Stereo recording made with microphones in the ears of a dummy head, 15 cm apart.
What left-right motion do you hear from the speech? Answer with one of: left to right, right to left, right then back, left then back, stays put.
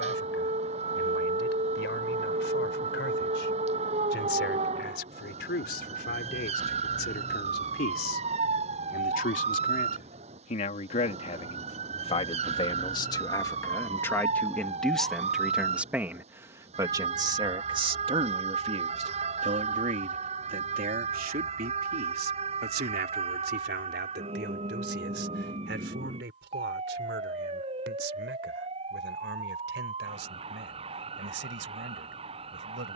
left to right.